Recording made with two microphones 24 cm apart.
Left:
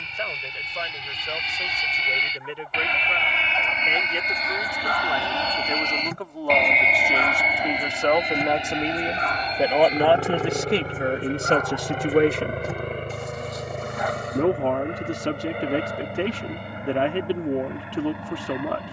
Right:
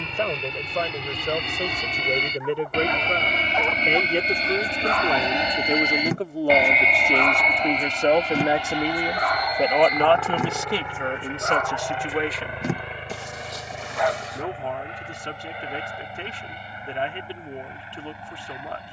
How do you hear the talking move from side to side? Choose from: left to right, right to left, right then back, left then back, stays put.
right to left.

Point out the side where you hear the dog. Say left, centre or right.
right.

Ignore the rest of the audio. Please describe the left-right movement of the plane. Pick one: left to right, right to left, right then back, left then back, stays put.
right to left.